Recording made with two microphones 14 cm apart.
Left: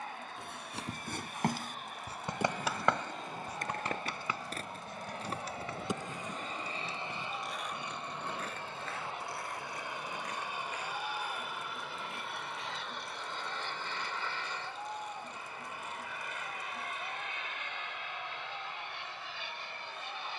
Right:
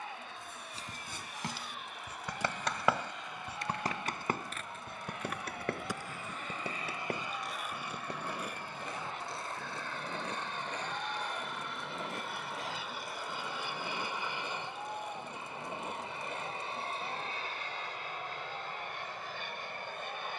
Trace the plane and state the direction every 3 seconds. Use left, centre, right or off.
left, left, left, centre, centre, right, right.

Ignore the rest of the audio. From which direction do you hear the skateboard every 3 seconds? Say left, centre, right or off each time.
left, left, centre, right, right, right, off.